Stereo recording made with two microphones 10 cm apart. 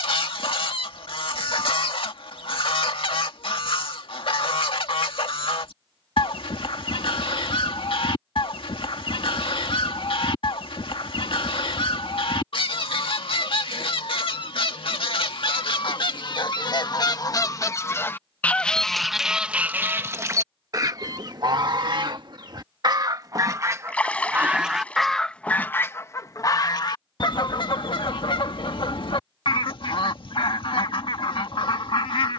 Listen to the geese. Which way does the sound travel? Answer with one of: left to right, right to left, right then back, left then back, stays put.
right then back.